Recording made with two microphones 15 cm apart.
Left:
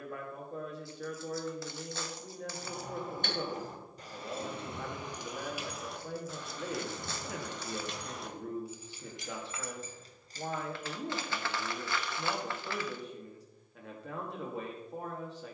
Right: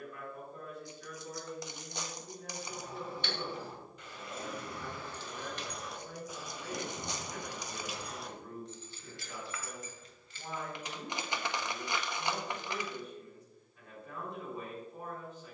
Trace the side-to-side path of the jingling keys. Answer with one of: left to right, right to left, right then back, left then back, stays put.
right then back.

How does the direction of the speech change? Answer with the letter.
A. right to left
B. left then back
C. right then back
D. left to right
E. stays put
E.